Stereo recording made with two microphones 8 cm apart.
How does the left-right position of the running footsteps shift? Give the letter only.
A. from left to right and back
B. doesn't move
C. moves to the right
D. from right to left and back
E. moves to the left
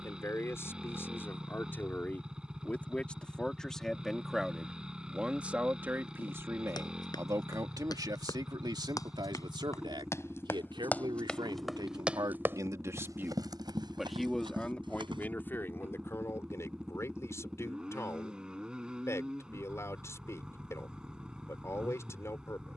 C.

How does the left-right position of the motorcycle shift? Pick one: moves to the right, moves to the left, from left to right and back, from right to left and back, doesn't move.
doesn't move.